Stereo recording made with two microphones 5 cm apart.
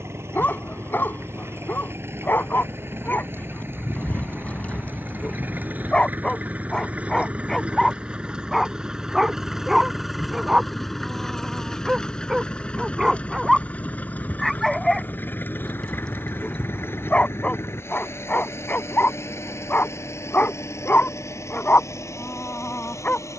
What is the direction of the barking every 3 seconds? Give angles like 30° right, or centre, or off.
40° left, 30° left, 10° left, 10° right, centre, 20° left, 30° left, 40° left.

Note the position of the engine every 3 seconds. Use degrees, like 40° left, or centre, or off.
50° right, 40° right, 20° right, centre, 20° left, 40° left, 60° left, 60° left.